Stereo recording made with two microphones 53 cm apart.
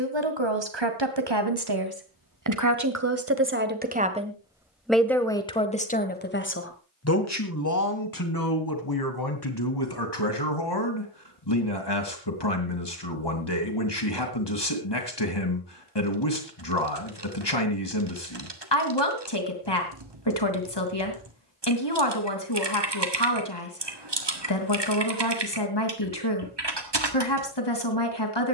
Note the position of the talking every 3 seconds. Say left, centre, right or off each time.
right, centre, left, left, left, left, left, left, left, left.